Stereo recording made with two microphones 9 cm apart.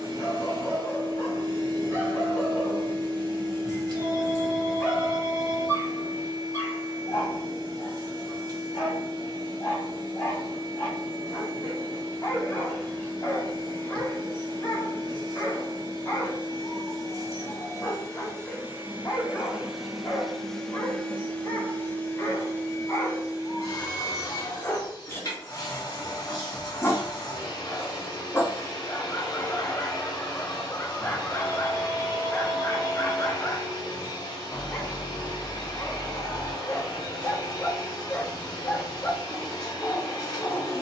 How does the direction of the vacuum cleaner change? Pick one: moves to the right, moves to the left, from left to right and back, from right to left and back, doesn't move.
moves to the left.